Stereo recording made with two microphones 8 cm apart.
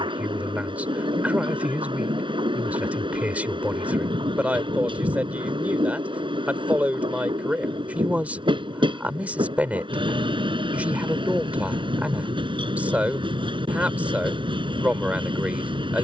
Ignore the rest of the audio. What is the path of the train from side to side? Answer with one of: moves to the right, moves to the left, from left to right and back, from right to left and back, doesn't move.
doesn't move.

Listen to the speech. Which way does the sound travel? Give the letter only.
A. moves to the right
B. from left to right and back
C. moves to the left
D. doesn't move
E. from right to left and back
D.